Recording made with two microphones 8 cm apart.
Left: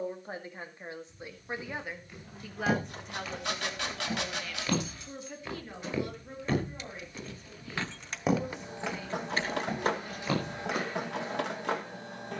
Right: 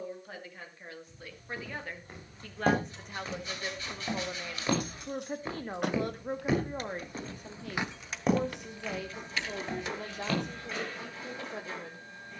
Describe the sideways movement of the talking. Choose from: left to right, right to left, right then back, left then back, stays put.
left to right.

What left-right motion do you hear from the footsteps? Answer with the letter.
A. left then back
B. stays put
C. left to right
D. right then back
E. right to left
E.